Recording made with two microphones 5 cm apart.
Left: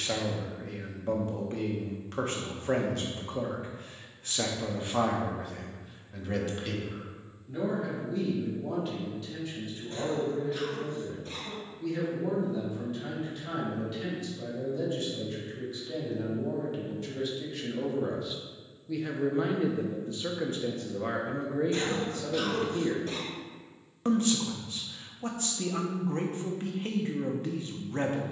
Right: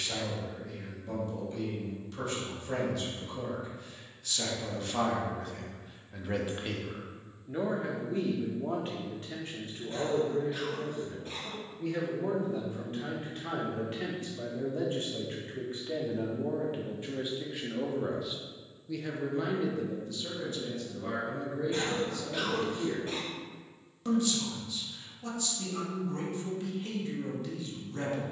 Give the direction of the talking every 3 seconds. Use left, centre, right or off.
left, left, right, right, right, right, left, left, left, left.